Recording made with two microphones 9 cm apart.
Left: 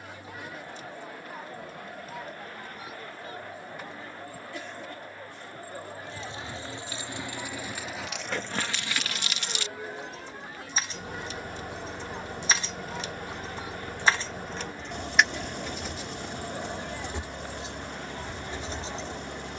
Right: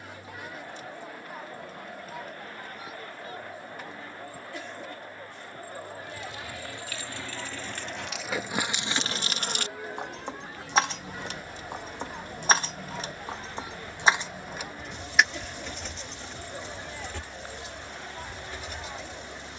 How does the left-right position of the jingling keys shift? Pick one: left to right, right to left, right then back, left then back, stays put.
right then back.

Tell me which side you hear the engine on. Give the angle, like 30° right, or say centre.
60° left.